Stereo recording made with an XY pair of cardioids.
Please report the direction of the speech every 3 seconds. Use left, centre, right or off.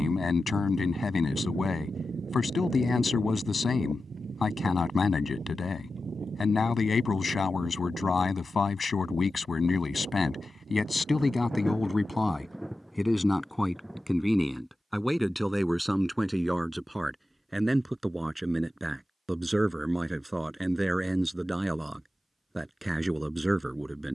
left, left, left, left, centre, centre, centre, centre.